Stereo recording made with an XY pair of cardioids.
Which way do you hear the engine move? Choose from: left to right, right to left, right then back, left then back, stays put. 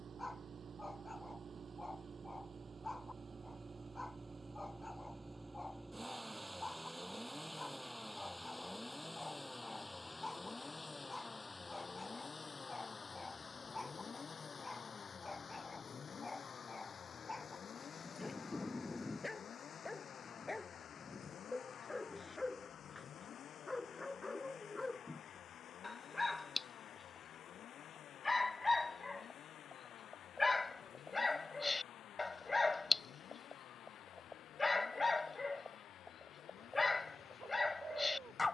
right to left.